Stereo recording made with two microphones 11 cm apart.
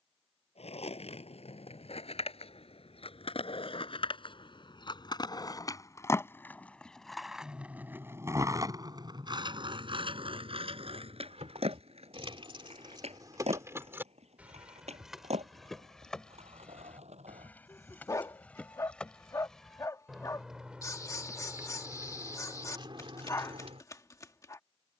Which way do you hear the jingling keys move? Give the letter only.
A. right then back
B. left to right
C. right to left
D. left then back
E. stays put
D.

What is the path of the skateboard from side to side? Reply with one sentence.
In this clip you hear the skateboard go from the left side to the right.